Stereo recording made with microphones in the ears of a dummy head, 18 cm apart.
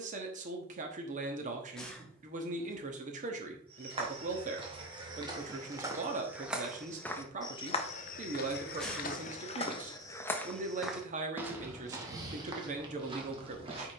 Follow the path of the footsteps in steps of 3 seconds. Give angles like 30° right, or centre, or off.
off, 20° right, 20° left, 10° left, 20° right.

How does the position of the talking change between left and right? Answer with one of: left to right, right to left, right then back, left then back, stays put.
stays put.